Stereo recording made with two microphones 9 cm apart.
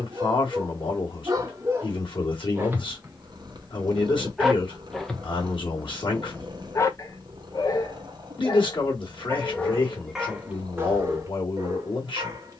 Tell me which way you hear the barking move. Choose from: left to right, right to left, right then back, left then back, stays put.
left then back.